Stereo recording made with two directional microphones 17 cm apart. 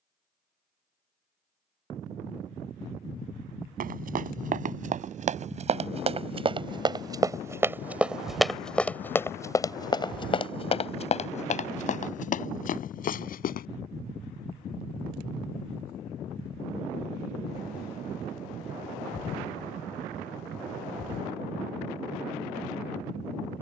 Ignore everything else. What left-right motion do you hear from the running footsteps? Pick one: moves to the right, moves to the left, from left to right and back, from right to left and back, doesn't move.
moves to the left.